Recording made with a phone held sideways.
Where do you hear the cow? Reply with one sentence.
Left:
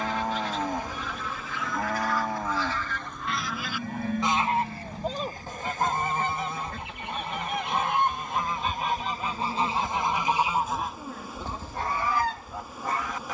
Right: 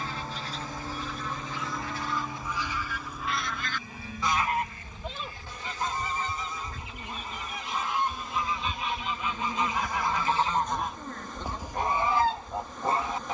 You can hear the cow on the left.